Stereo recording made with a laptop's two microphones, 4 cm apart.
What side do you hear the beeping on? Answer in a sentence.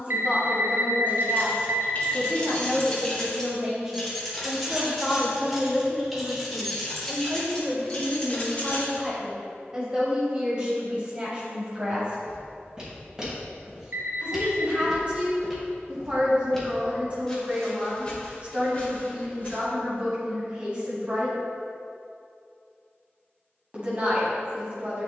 In this clip you hear the beeping on the right.